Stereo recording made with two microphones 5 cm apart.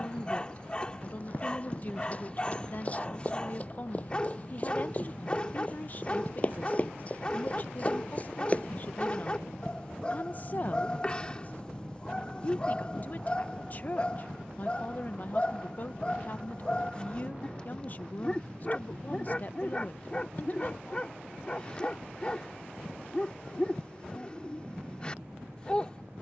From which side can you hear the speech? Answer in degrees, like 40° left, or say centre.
40° left.